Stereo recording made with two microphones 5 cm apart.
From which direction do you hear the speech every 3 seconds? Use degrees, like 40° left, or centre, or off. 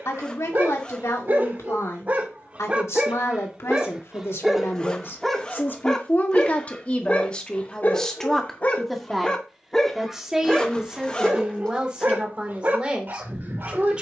80° left, 60° left, 20° left, 10° right, 20° right.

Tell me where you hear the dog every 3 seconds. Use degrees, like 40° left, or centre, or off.
40° right, 10° right, 30° left, 10° right, 40° right.